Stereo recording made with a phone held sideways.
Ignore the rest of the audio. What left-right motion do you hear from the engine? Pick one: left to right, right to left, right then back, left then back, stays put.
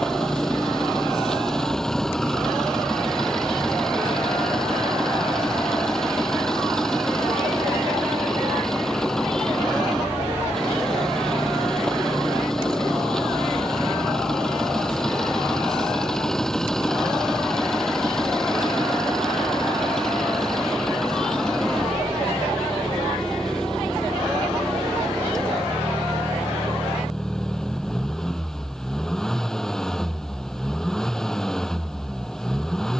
stays put.